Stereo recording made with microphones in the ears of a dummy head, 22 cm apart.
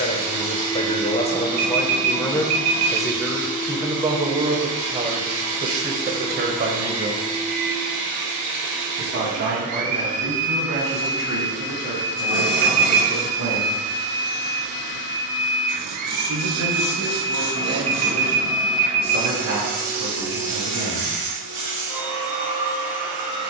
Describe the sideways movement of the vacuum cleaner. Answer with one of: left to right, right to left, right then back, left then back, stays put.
stays put.